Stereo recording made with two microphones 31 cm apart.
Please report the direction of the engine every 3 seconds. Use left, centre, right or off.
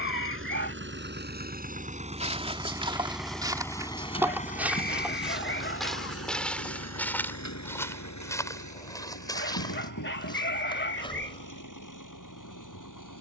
right, left, left, left, left.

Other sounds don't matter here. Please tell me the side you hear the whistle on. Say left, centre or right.
left.